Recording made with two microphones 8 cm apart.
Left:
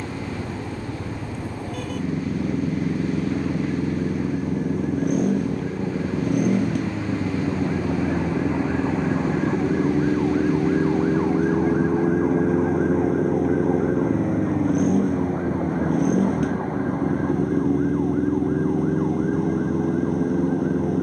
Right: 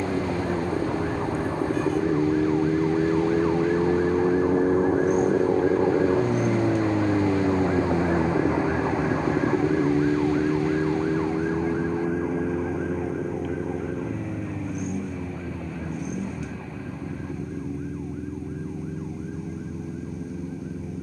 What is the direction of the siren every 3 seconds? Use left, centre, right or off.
right, right, right, centre, left, left, left.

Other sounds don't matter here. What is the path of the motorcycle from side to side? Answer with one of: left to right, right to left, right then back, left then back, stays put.
stays put.